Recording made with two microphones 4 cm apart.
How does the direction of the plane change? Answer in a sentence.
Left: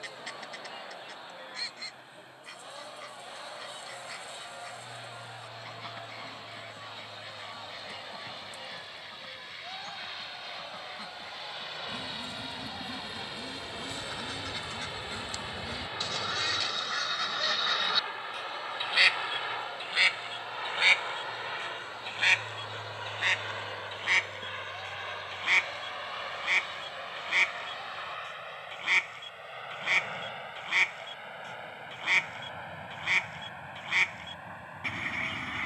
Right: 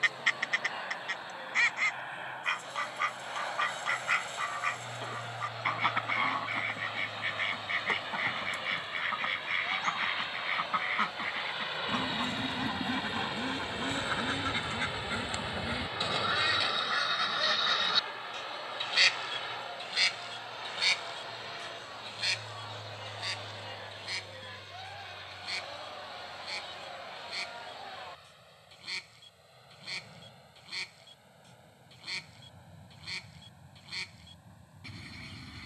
You can hear the plane move from right to left.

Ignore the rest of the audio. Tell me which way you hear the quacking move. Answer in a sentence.
In this clip you hear the quacking move from right to left.